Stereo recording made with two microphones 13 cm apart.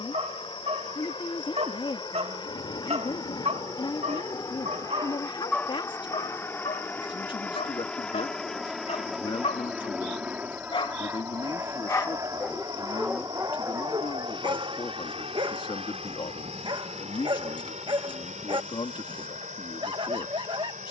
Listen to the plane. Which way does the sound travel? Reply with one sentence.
You can hear the plane travel towards the right.